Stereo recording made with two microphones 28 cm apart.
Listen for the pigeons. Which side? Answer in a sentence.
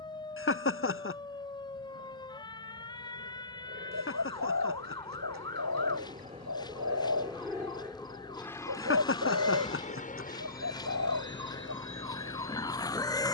You can hear the pigeons on the right.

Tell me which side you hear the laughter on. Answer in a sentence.
In this clip you hear the laughter on the left.